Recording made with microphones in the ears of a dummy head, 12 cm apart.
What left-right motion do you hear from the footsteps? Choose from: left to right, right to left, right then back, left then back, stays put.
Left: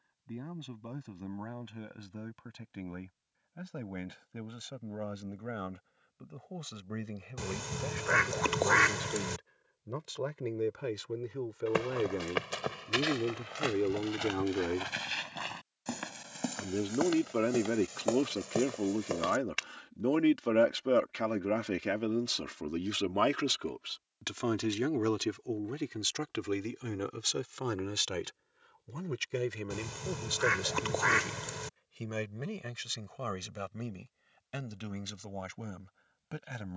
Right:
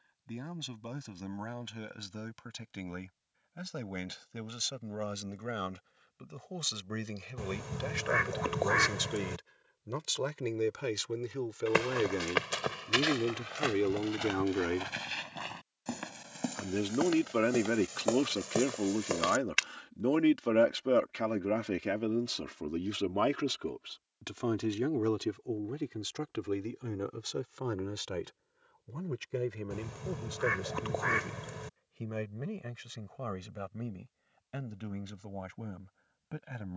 left then back.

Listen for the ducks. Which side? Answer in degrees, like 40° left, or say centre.
70° left.